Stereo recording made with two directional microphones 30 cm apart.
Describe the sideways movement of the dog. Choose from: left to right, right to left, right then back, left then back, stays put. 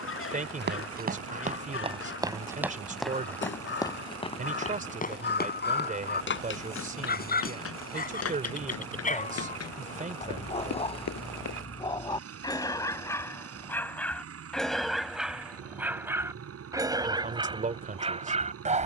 left to right.